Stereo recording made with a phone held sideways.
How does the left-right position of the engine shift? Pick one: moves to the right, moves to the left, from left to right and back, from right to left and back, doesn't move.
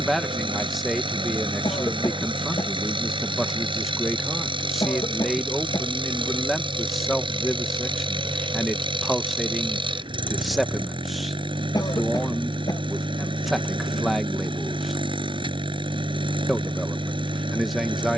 doesn't move.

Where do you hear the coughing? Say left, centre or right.
left.